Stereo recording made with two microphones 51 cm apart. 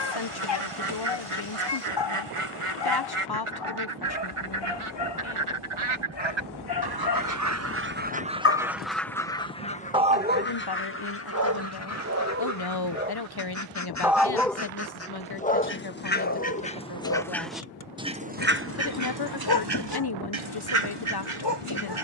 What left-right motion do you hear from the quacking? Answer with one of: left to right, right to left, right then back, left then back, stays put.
left then back.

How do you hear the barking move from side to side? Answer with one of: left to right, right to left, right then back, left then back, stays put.
right then back.